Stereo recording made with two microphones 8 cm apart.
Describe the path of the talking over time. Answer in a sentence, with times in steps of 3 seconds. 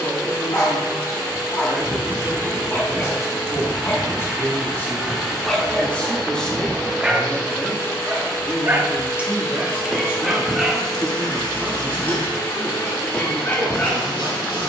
In this clip you hear the talking on the left from 0 s, in the centre from 6 s and on the right from 9 s.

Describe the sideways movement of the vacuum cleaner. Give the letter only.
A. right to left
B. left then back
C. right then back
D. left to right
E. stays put
A.